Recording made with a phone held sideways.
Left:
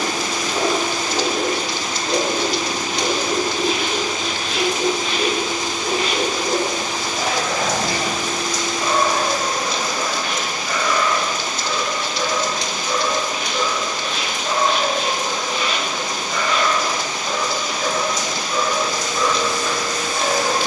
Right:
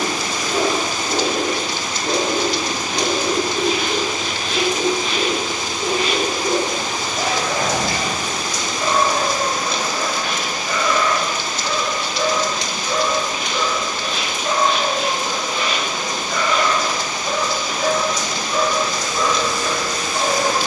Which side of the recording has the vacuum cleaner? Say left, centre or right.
left.